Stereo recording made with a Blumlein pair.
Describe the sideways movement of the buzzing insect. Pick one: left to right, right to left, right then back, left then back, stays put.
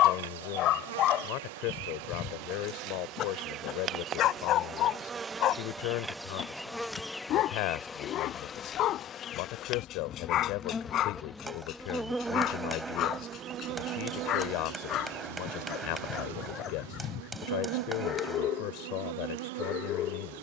left then back.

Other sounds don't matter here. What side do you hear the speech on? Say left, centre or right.
left.